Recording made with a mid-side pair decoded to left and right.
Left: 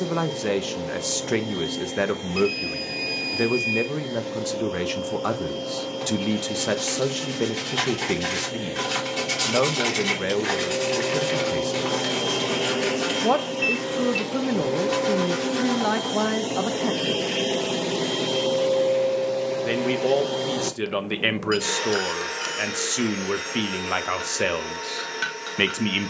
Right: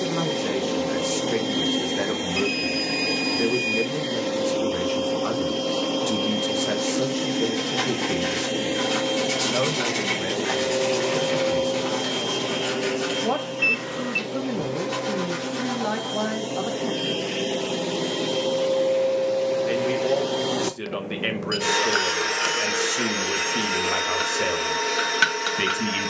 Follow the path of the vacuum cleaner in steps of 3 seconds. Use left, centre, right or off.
right, right, right, right, left, left, centre, right, right.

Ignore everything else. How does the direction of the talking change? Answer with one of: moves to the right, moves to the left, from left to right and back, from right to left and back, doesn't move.
doesn't move.